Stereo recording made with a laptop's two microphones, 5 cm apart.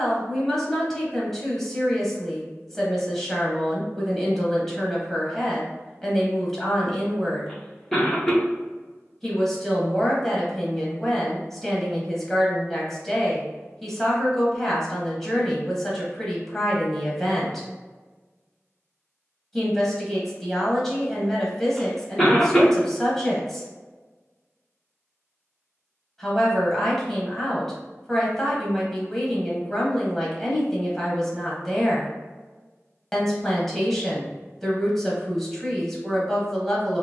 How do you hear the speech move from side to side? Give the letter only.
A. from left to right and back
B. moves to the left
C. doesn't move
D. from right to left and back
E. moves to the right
C.